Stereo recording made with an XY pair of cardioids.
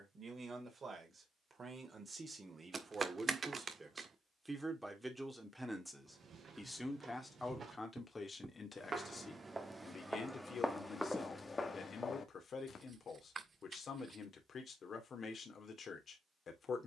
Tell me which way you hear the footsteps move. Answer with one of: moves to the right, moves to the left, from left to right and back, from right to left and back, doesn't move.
moves to the left.